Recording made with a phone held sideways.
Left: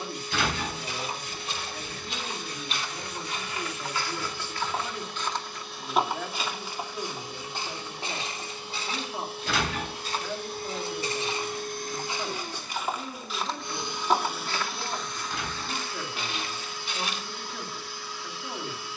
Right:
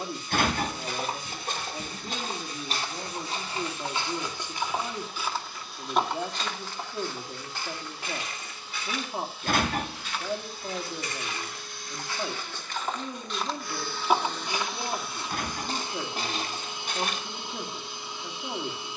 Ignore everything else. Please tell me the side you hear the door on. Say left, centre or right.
right.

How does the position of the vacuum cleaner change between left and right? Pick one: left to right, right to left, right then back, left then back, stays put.
left to right.